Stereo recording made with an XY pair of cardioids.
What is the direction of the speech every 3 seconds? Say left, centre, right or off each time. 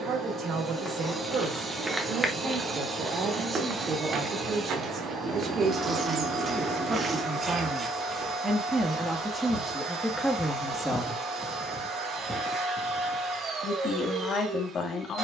right, right, right, centre, left.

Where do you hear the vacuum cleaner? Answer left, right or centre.
right.